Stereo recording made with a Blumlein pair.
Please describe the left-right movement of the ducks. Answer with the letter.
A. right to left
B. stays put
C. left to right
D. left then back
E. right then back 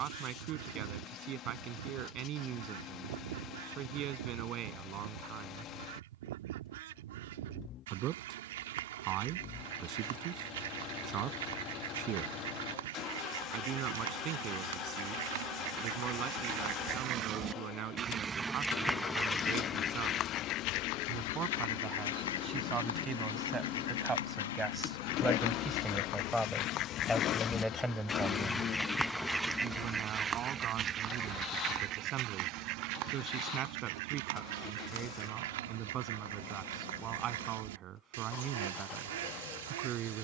D.